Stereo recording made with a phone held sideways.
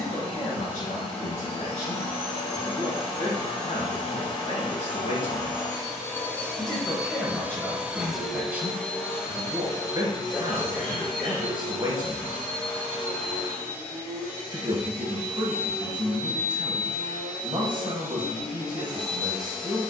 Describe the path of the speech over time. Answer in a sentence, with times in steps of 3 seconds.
You can hear the speech on the left from 0 s, in the centre from 6 s and on the right from 9 s.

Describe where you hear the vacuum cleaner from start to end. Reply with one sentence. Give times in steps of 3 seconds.
In this clip you hear the vacuum cleaner on the left from 0 s, in the centre from 6 s and on the left from 9 s.